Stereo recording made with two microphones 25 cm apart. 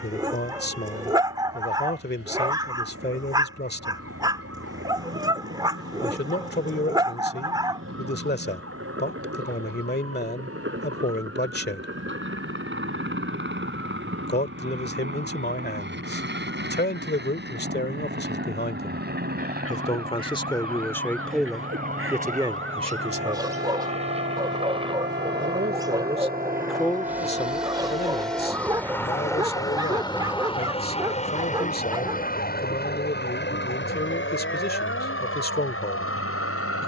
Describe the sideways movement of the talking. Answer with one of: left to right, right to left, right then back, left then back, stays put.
right then back.